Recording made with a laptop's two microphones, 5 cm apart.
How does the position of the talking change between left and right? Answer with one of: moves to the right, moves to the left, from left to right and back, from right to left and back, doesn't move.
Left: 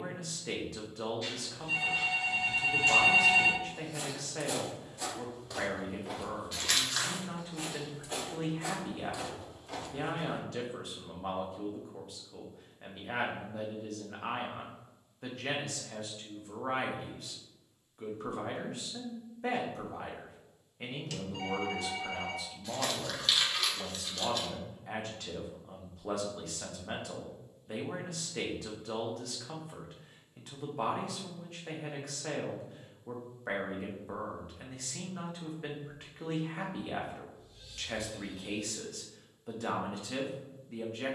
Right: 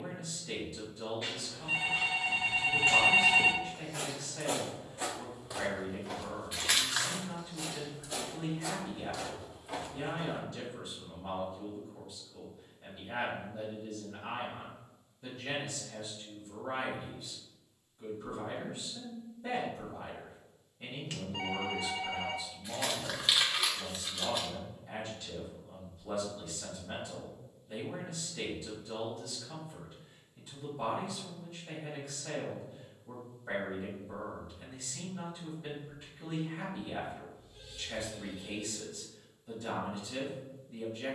doesn't move.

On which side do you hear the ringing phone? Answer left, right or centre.
right.